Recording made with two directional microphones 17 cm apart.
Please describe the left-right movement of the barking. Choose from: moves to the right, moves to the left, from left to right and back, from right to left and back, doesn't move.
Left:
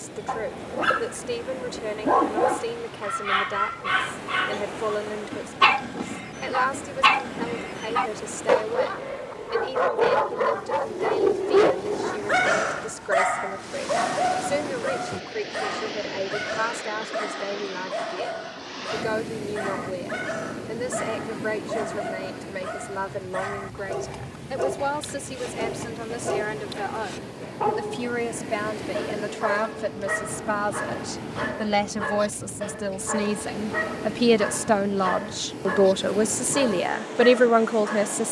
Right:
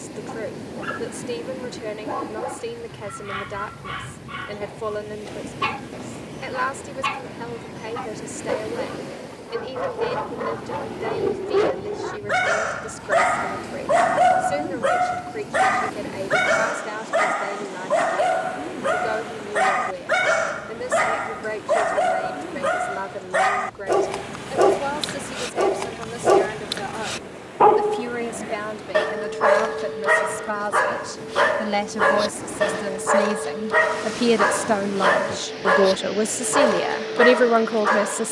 moves to the right.